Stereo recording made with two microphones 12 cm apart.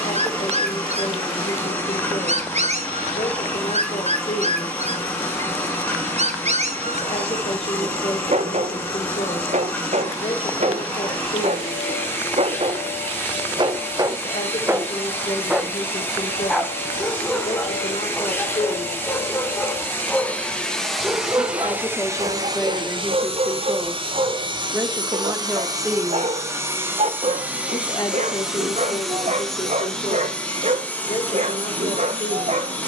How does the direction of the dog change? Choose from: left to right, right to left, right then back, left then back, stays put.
left then back.